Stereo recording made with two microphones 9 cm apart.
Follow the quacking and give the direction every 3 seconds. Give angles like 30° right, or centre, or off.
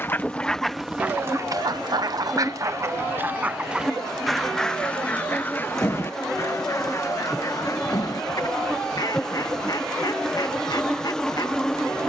20° right, centre, 40° left, 50° left.